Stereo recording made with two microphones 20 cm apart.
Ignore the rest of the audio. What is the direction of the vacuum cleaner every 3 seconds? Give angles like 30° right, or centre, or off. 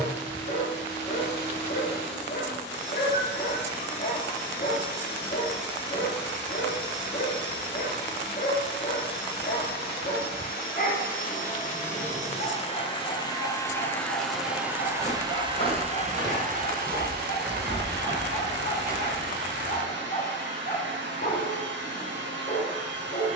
60° left, 60° left, 60° left, 50° left, 20° left, 40° right, 70° right, 70° right.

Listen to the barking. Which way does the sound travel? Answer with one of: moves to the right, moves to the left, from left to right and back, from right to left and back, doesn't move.
doesn't move.